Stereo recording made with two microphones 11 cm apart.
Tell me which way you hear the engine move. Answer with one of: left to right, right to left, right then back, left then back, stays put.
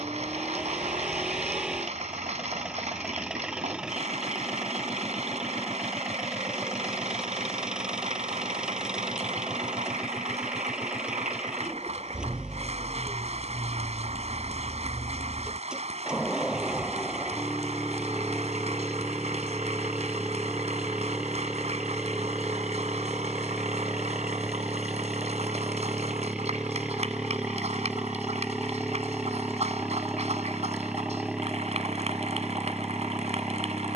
stays put.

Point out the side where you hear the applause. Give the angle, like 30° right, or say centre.
70° right.